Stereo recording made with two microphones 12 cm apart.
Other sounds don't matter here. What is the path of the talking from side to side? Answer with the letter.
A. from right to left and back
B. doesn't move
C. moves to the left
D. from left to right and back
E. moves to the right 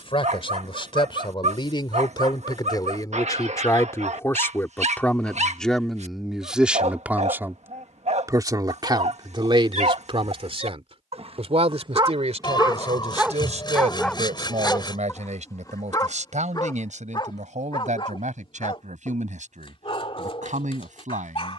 E.